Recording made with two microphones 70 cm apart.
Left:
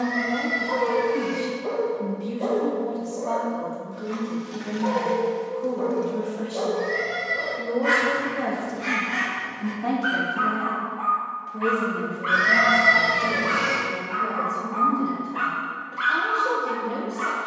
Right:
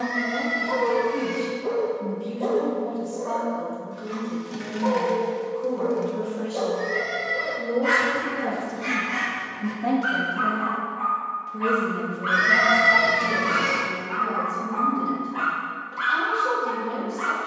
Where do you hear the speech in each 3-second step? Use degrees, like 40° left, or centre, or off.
50° left, 50° left, 30° left, 10° right, 40° right, 40° right.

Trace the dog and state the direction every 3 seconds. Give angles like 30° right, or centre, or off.
50° right, 40° right, 20° right, 10° right, 40° right, 50° right.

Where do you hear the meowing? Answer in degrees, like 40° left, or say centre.
20° left.